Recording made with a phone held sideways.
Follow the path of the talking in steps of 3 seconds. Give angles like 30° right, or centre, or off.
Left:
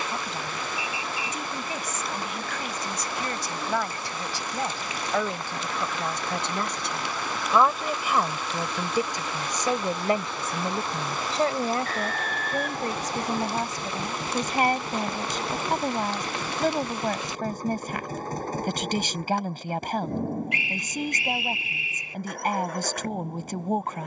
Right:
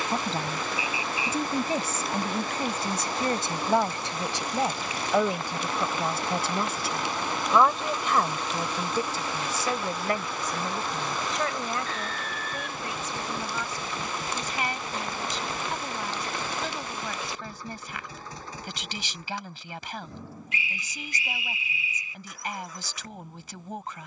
30° right, 20° right, centre, 30° left, 50° left, 50° left, 50° left, 50° left.